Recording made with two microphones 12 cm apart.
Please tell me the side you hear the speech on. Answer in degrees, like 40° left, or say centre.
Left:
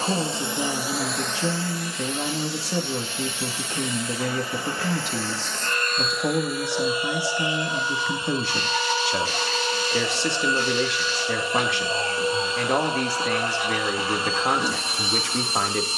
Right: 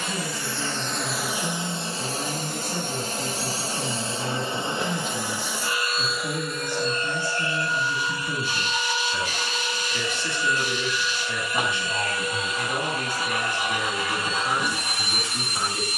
70° left.